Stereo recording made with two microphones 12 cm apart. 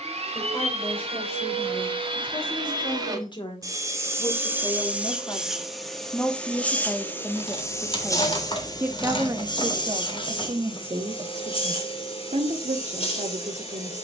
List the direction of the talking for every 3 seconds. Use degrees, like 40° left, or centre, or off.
50° left, 30° left, 10° left, 40° right, 70° right.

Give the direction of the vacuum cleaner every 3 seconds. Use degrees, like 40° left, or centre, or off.
50° right, 10° right, 20° left, 40° left, 50° left.